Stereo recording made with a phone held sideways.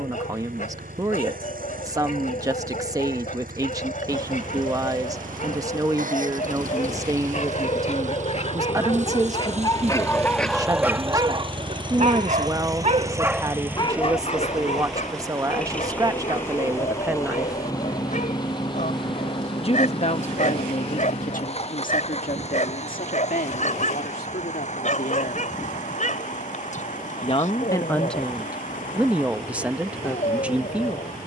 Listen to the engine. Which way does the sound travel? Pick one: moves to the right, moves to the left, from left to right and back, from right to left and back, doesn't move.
moves to the left.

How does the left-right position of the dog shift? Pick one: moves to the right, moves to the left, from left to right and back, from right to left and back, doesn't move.
from left to right and back.